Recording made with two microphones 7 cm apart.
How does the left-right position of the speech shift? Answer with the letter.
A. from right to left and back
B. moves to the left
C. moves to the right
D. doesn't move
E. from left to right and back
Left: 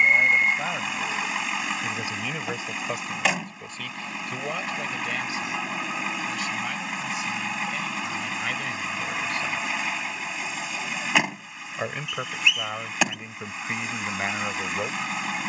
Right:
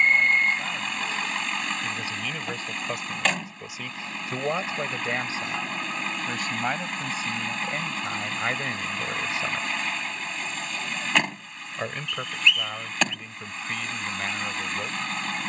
E.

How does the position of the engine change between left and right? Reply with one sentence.
In this clip you hear the engine stay put.